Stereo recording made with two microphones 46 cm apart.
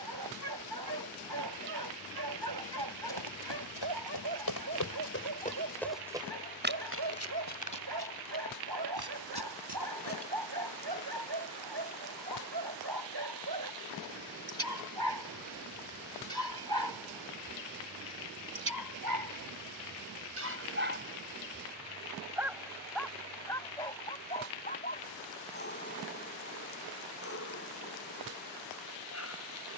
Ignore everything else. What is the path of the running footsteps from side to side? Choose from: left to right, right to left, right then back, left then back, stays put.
left to right.